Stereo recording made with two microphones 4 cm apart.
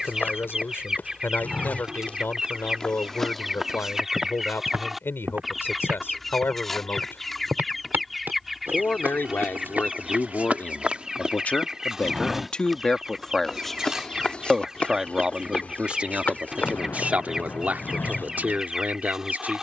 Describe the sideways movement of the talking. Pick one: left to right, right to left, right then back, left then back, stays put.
left to right.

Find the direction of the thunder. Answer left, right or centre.
left.